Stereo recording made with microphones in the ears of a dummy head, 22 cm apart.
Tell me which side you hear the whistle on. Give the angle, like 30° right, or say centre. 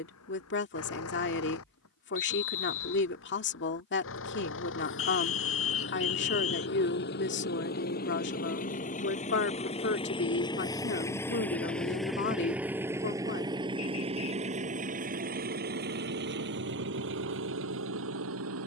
60° left.